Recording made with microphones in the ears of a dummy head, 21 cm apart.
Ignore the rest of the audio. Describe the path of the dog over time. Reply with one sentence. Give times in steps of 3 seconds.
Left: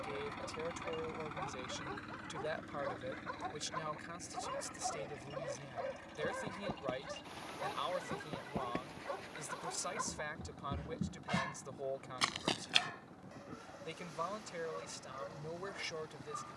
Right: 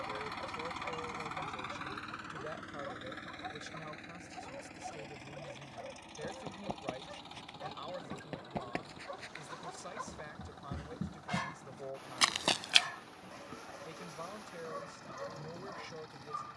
In this clip you hear the dog in the centre from 0 s, on the left from 3 s, in the centre from 9 s and on the right from 12 s.